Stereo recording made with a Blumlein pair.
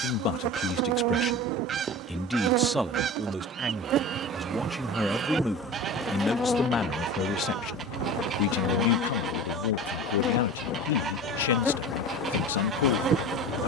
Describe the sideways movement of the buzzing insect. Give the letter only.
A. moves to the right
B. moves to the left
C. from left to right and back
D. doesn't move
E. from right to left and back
E.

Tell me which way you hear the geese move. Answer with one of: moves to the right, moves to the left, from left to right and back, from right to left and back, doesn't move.
doesn't move.